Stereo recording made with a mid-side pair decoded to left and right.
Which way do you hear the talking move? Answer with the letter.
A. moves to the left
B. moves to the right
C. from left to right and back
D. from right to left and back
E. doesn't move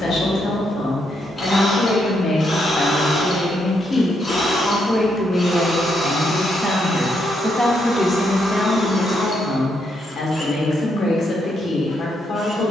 C.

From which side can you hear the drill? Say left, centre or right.
left.